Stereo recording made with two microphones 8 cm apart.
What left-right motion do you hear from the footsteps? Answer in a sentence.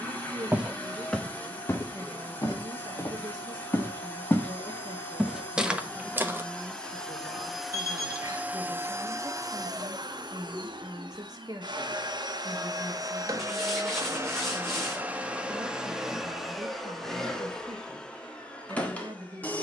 You can hear the footsteps go left and come back.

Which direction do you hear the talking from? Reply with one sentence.
In this clip you hear the talking on the right.